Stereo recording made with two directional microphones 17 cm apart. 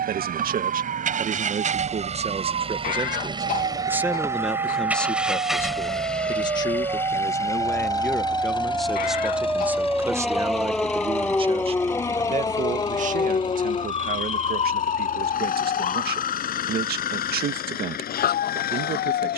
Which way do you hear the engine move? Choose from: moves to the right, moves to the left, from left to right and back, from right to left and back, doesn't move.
moves to the left.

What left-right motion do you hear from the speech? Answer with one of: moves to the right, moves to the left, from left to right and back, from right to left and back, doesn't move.
from right to left and back.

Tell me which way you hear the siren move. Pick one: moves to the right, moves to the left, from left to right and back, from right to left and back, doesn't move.
moves to the left.